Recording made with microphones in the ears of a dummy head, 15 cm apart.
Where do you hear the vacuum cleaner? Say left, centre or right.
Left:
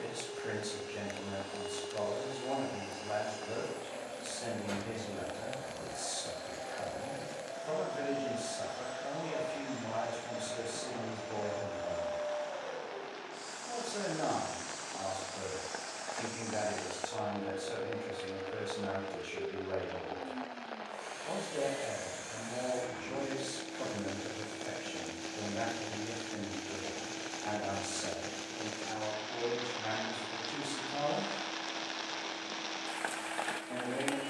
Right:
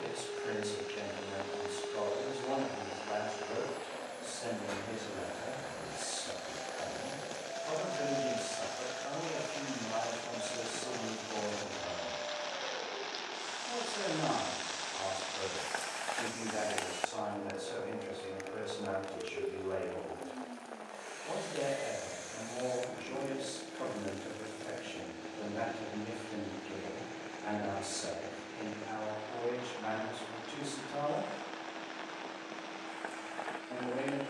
left.